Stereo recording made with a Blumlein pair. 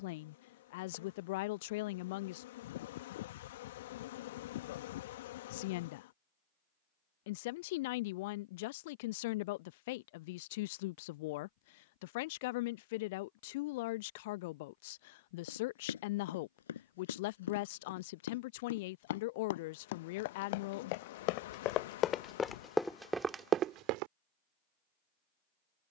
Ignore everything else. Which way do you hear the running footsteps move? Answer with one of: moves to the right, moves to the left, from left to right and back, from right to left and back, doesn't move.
moves to the right.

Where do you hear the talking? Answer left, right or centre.
left.